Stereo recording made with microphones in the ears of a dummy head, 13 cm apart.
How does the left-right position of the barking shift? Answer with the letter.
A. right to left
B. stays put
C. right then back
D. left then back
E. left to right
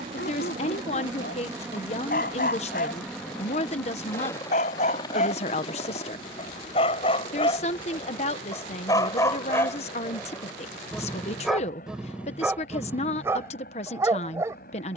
E.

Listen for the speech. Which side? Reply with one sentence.
In this clip you hear the speech on the left.